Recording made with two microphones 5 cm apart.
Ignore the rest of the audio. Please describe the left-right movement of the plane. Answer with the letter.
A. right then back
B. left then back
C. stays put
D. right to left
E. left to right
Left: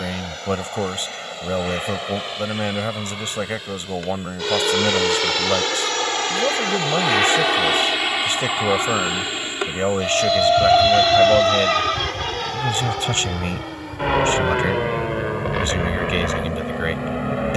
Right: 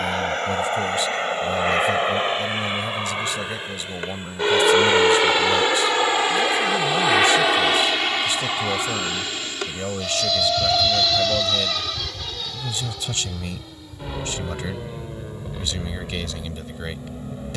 D.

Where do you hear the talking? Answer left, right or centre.
left.